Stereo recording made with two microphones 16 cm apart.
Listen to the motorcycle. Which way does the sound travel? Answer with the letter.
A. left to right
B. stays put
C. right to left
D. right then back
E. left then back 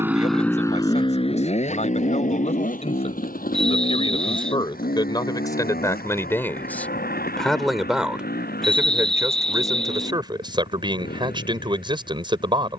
C.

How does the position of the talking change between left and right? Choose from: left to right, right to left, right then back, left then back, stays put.
left to right.